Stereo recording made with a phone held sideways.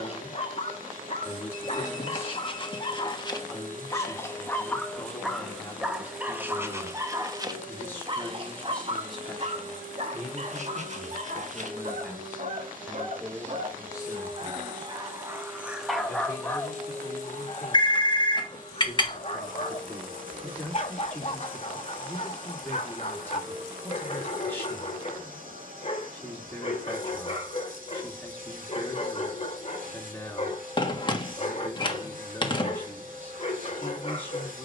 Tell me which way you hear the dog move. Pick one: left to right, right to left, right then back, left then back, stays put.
right then back.